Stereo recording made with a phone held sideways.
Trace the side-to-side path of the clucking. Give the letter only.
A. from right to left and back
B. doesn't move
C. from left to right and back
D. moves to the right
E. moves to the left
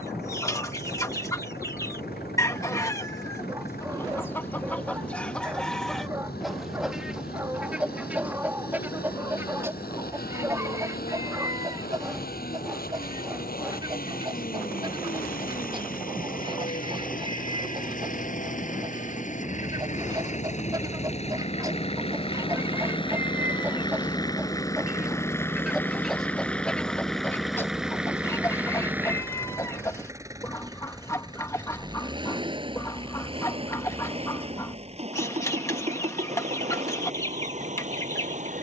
C.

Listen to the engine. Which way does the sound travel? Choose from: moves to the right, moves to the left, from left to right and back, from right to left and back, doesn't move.
moves to the right.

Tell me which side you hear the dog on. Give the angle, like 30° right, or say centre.
10° right.